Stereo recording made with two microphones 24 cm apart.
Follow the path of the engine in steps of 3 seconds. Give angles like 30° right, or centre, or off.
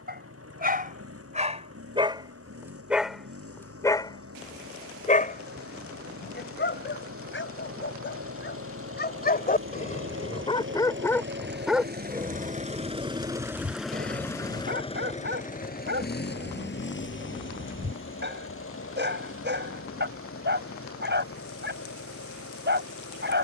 80° right, 80° right, 70° right, 60° right, 10° right, 50° left, 70° left, 70° left.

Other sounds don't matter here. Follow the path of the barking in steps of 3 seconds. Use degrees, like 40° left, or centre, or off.
30° right, 20° left, 50° left, 20° left, 30° right, 50° right, 50° right, 50° right.